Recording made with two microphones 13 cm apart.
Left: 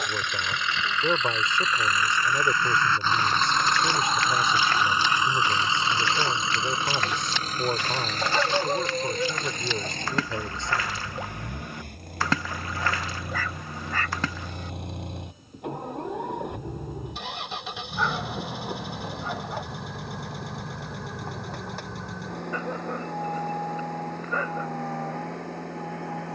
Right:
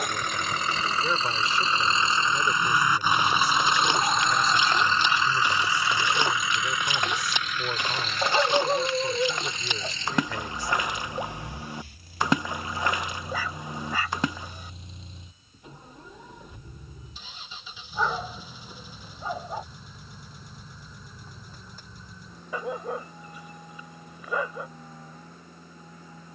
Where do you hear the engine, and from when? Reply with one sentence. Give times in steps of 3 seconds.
You can hear the engine on the right from 0 s, in the centre from 3 s and on the left from 6 s.